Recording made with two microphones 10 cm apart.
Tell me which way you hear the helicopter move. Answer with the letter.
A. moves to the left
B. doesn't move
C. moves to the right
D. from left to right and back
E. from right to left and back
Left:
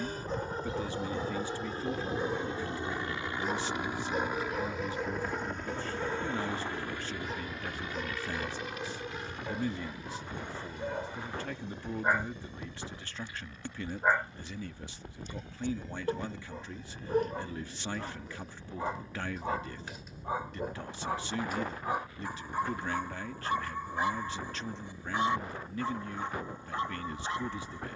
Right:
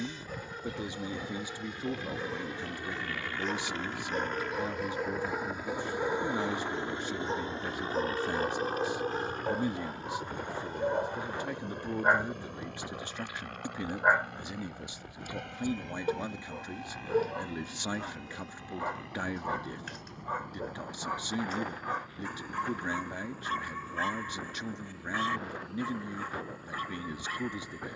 C.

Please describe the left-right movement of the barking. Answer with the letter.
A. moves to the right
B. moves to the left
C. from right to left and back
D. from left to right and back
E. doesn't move
D.